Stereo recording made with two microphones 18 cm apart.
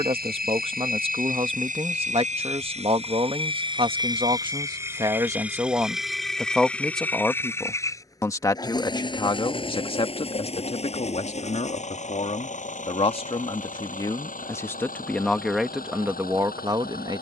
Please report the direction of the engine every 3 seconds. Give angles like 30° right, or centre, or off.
50° right, 20° right, 10° left, 30° left, 40° left, 50° left.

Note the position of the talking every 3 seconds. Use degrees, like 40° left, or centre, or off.
30° right, 20° right, 10° left, 30° left, 30° left, 10° right.